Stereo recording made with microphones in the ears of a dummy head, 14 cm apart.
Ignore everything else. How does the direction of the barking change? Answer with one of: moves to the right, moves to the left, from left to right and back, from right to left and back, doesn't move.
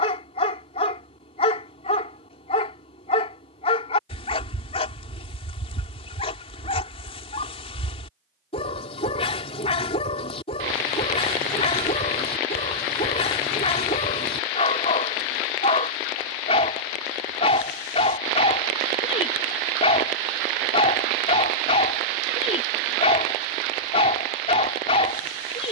doesn't move.